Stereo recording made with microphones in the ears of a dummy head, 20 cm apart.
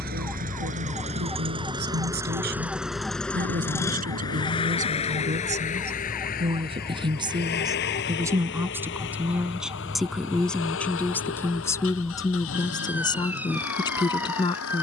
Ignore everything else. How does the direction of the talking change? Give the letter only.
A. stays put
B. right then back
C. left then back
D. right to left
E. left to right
D.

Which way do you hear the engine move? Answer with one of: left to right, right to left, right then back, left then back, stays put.
right to left.